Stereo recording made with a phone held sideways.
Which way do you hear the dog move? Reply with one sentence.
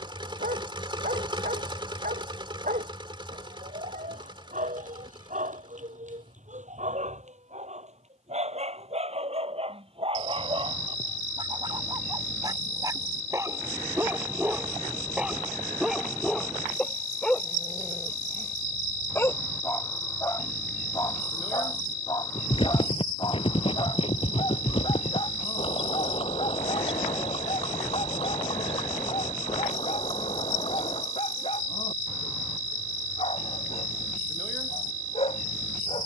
In this clip you hear the dog travel towards the left.